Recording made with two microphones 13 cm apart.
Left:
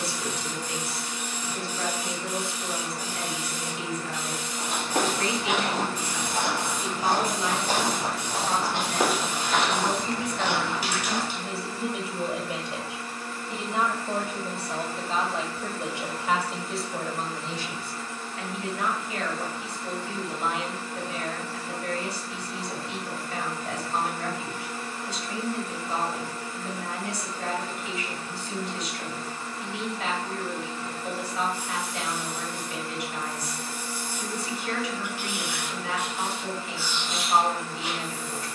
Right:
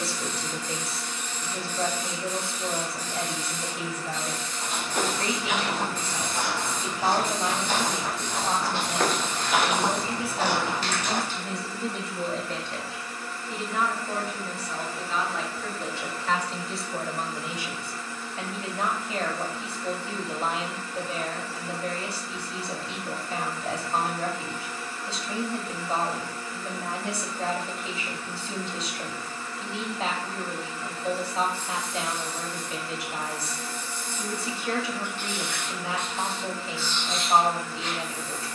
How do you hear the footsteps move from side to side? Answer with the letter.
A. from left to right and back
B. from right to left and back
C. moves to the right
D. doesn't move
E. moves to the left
C.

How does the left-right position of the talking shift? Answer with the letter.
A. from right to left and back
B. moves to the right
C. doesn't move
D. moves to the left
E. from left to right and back
A.